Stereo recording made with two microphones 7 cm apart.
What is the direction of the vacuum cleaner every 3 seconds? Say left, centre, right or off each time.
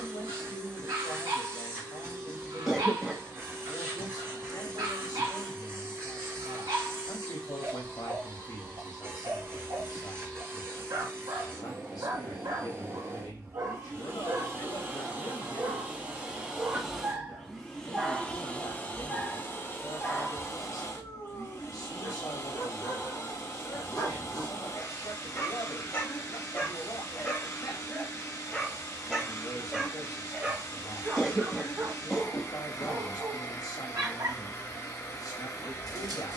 right, right, right, right, right, centre, left, left, left, left, left, left.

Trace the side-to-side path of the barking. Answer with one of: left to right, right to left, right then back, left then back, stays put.
left then back.